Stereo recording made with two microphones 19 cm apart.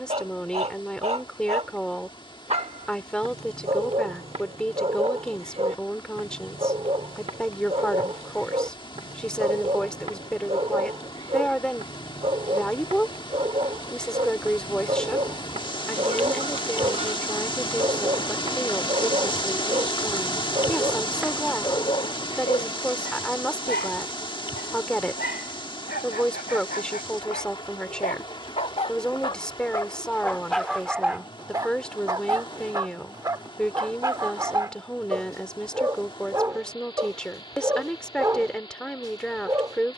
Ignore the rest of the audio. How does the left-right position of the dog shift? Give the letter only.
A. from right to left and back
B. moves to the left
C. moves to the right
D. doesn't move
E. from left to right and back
A.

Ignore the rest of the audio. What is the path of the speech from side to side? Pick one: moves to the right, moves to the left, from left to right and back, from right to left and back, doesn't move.
doesn't move.